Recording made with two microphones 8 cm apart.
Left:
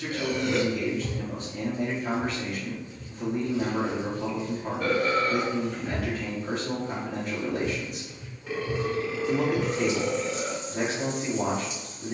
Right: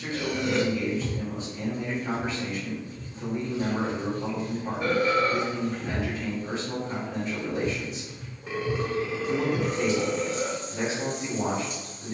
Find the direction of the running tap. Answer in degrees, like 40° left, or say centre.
50° right.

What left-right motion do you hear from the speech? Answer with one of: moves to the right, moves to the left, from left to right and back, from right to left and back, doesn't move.
doesn't move.